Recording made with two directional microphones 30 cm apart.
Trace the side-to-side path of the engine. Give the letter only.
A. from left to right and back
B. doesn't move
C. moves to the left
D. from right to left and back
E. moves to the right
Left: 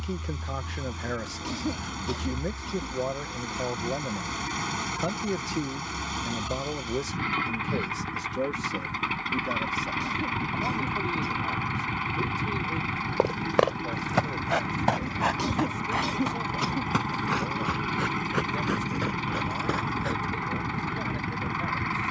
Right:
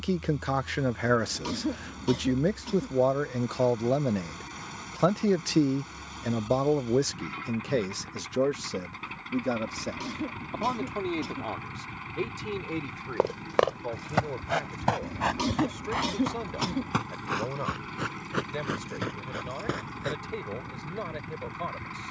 B.